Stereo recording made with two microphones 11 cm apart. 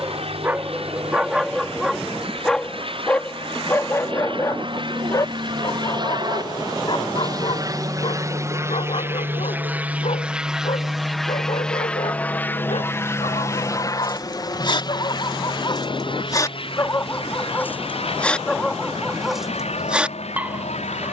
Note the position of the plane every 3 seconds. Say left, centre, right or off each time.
right, right, right, centre, left, left, left.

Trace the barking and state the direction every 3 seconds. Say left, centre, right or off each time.
centre, left, left, left, left, left, centre.